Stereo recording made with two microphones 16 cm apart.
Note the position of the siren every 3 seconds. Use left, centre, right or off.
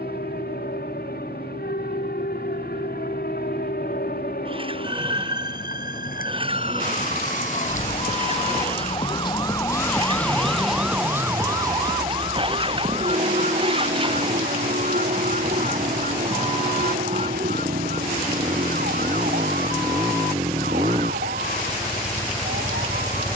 left, left, left, centre, right, right, right, right.